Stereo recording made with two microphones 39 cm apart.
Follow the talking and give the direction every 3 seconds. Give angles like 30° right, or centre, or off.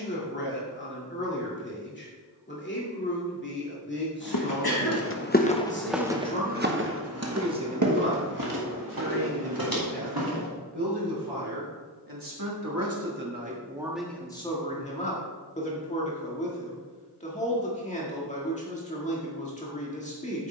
30° left, 30° left, 10° right, 70° right, 20° right, 20° left, 20° left.